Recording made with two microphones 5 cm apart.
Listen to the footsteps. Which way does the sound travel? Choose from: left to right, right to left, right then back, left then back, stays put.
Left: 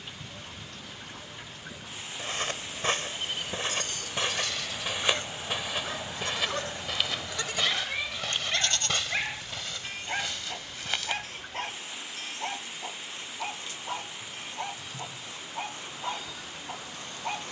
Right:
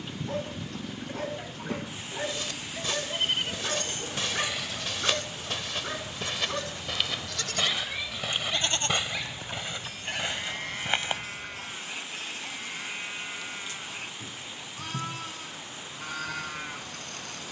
left to right.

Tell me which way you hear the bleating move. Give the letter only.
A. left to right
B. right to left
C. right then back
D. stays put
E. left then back
E.